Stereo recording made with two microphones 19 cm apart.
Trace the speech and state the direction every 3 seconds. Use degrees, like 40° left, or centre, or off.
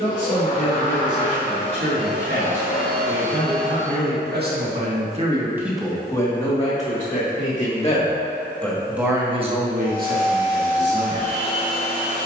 80° right, 50° right, 30° left, 50° right.